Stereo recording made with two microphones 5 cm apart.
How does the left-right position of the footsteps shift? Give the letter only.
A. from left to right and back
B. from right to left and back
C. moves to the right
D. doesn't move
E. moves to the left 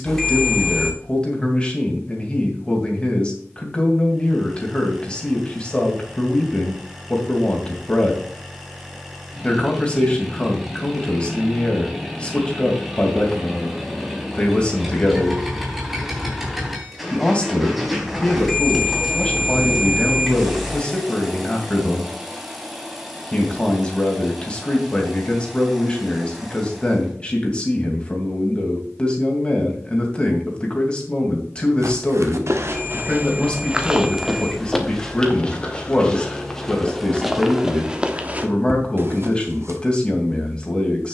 B.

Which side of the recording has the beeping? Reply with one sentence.
In this clip you hear the beeping in the centre.